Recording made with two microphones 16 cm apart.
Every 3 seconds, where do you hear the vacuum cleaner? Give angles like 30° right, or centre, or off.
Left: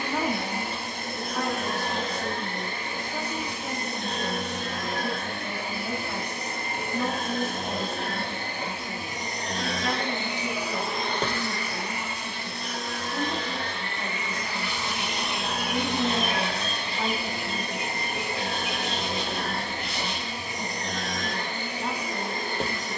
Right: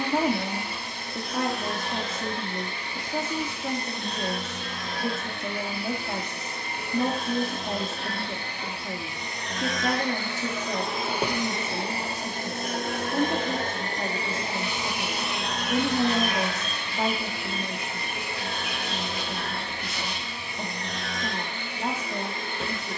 50° left, 50° left, 50° left, 10° left, 40° right, 30° left, 40° left, 40° left.